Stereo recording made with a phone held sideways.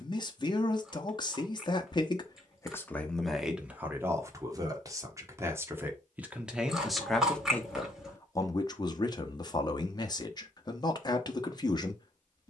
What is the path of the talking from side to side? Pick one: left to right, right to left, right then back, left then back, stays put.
right then back.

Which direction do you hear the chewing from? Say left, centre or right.
centre.